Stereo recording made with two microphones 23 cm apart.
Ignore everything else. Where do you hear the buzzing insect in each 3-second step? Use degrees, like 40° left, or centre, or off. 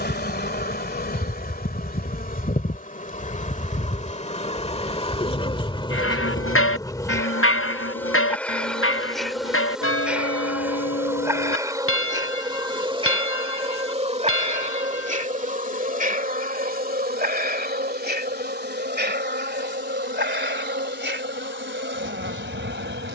40° left, 30° left, 10° left, 10° right, 30° right, 40° right, 50° right, 60° right.